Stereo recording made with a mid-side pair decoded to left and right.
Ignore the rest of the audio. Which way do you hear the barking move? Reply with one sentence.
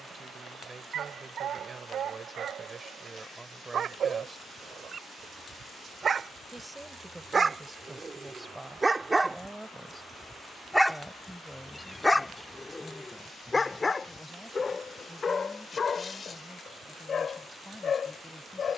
In this clip you hear the barking travel towards the left.